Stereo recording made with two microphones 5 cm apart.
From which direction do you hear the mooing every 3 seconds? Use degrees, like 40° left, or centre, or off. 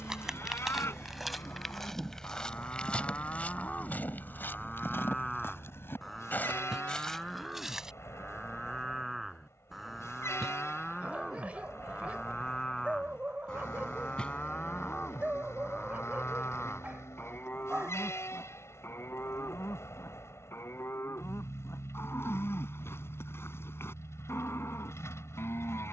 60° left, 20° left, centre, centre, 20° left, 40° left, 60° left, 60° left, 60° left.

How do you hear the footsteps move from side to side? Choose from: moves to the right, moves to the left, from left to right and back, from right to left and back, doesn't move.
from right to left and back.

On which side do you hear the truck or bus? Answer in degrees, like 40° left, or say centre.
70° left.